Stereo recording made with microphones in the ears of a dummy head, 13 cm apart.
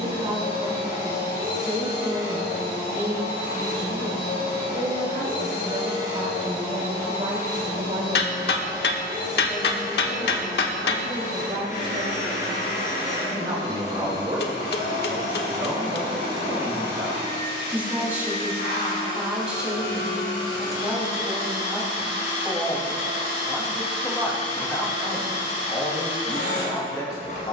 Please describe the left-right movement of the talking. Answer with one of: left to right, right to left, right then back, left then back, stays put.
right to left.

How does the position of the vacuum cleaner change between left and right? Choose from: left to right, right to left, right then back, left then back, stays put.
stays put.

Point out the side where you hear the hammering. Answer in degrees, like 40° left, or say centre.
80° left.